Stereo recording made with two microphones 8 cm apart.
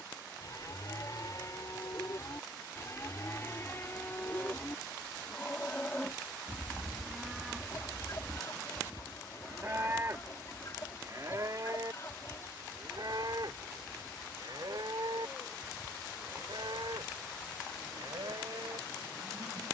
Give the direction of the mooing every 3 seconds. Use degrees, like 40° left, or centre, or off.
40° left, 30° left, centre, 40° right, 60° right, 70° right, 80° right.